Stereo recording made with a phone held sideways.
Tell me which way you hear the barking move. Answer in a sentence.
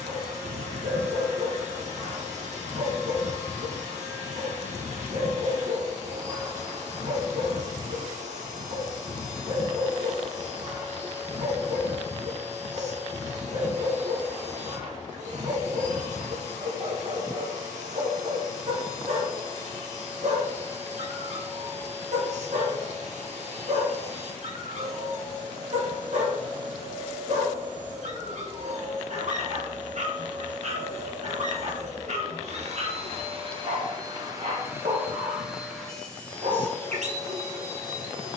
In this clip you hear the barking stay in one place.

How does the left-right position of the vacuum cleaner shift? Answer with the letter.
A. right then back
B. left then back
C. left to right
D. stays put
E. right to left
E.